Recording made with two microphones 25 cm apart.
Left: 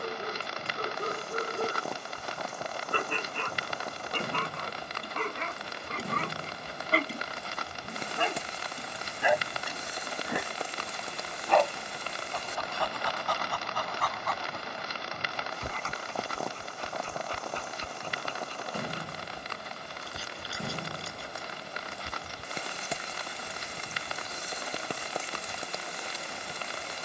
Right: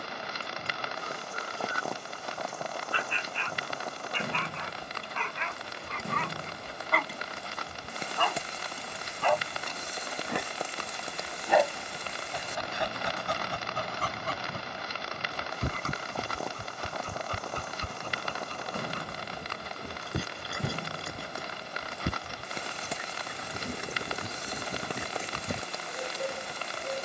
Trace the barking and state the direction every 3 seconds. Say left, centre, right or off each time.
left, left, left, centre, right, right, right, right, right.